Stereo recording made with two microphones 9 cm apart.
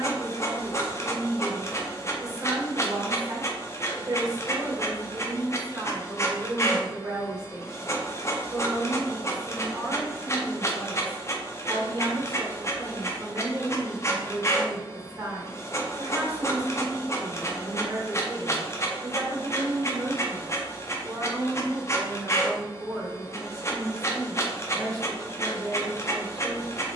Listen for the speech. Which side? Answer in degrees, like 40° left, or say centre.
40° right.